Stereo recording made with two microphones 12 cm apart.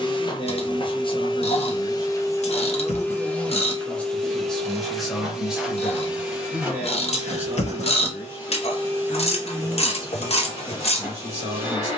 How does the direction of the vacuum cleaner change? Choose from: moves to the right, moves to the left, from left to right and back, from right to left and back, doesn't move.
moves to the right.